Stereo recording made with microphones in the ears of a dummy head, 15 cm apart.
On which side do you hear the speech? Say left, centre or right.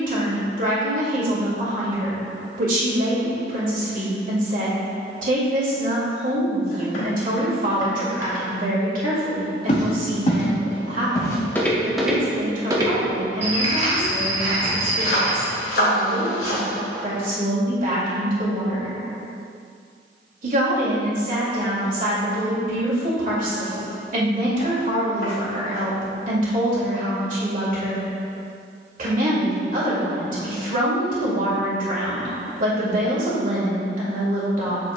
right.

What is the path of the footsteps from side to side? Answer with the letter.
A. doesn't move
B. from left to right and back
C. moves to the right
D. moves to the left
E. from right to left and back
C.